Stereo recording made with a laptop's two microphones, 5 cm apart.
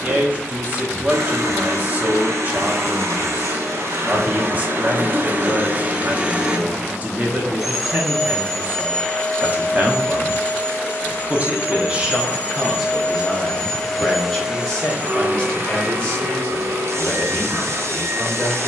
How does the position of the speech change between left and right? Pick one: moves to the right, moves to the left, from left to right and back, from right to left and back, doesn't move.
moves to the left.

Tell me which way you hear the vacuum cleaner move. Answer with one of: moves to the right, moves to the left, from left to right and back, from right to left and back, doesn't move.
from right to left and back.